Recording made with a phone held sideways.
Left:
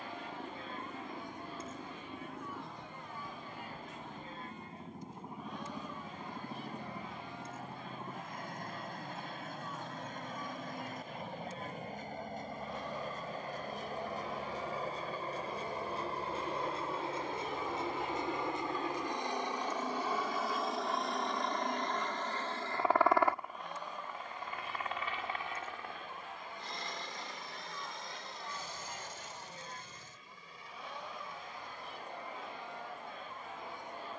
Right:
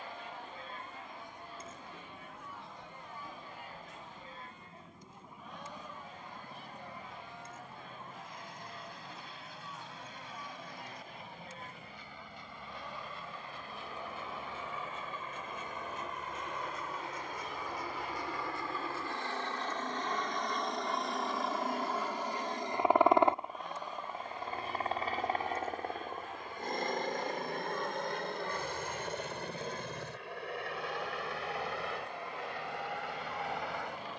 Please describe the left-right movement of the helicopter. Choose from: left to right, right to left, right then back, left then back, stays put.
left to right.